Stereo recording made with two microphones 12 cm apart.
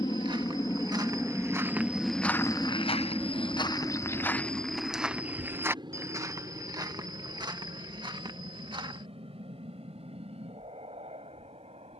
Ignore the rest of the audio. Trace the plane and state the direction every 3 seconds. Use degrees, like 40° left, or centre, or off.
10° left, 30° right, 40° right, 50° right.